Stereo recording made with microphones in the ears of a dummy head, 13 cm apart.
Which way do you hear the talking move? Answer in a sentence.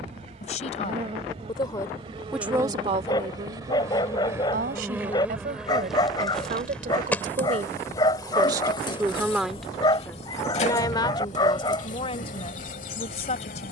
In this clip you hear the talking go right and come back.